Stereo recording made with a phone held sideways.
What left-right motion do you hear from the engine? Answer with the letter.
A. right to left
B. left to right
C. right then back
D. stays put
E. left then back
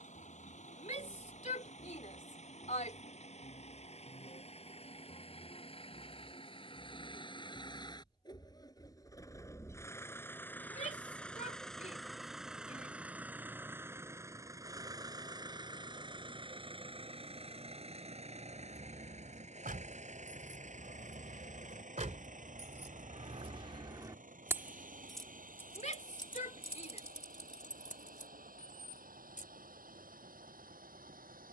B.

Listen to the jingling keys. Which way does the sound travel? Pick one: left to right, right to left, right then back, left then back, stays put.
right to left.